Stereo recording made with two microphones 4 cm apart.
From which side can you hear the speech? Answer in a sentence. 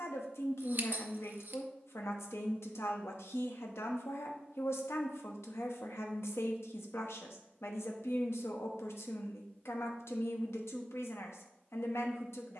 You can hear the speech on the left.